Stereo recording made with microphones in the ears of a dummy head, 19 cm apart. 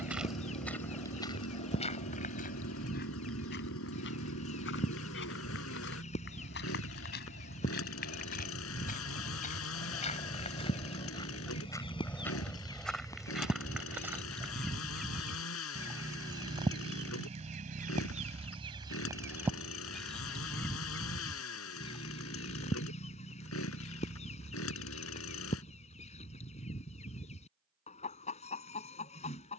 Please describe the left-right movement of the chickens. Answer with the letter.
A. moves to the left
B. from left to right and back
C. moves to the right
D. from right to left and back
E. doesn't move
B.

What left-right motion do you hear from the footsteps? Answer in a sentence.
You can hear the footsteps move from right to left and back again.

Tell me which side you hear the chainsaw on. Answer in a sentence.
You can hear the chainsaw on the left.